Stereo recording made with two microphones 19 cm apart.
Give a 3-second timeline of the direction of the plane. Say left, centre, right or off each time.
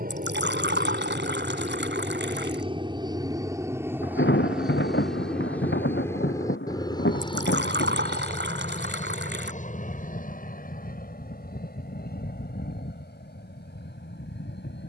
right, centre, left, left, left.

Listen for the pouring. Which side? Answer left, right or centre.
right.